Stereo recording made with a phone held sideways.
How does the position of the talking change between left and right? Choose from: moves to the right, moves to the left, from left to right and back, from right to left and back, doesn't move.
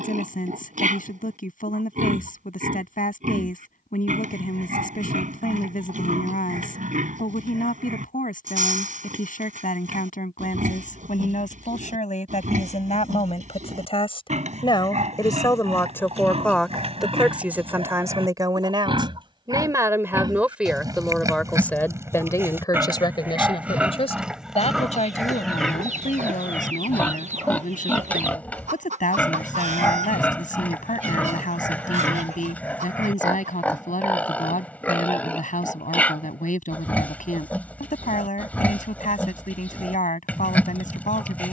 from left to right and back.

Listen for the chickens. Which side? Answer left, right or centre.
right.